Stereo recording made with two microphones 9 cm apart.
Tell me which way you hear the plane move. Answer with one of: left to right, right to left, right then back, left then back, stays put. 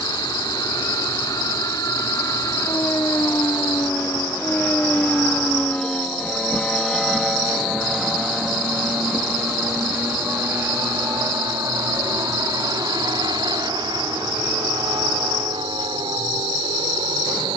left to right.